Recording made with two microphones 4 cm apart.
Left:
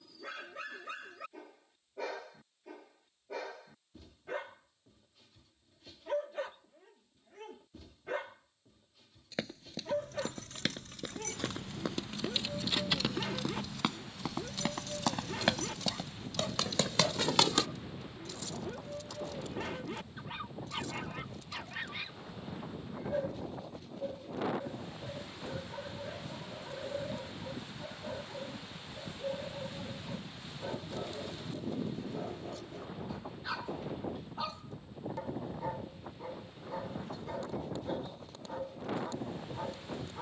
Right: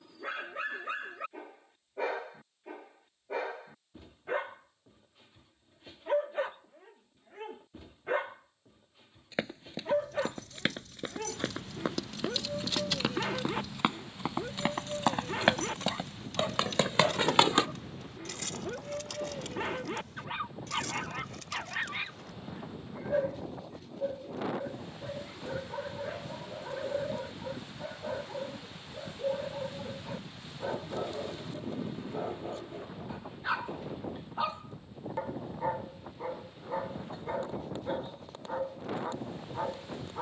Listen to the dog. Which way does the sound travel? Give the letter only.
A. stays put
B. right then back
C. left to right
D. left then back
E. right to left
A.